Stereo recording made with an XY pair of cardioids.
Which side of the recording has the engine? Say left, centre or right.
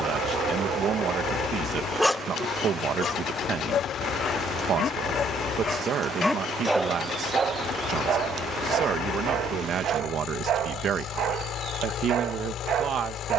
left.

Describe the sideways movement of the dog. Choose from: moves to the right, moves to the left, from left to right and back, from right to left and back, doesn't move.
from right to left and back.